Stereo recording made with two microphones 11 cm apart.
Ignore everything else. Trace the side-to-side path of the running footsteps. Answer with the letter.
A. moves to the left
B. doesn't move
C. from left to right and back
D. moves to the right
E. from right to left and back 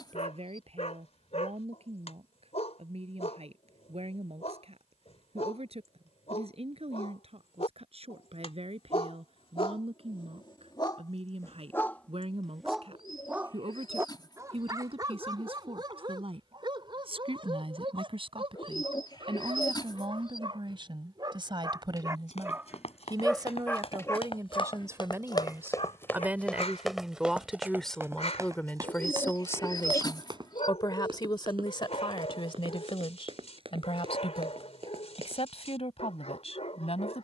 D.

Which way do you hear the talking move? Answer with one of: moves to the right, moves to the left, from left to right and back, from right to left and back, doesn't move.
moves to the left.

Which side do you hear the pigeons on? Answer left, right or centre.
left.